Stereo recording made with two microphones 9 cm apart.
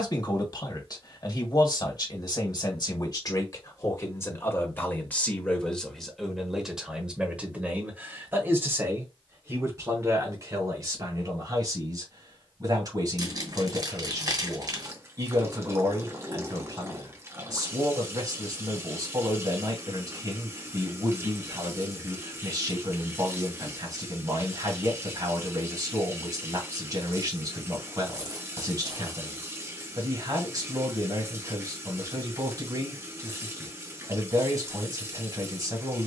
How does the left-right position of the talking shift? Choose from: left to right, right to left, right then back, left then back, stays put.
left to right.